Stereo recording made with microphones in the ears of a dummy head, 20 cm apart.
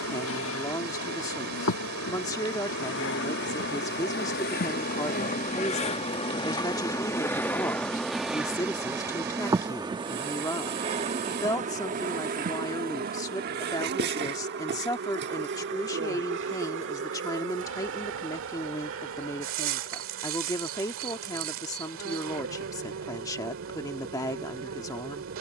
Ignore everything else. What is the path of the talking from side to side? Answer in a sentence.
You can hear the talking stay in one place.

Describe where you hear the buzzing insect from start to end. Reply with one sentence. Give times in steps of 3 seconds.
In this clip you hear the buzzing insect on the left from 0 s, in the centre from 6 s and on the right from 9 s.